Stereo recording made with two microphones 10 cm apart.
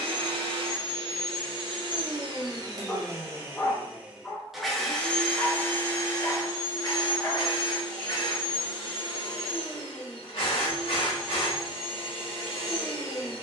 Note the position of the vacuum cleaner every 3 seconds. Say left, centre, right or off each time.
right, centre, left, left, left.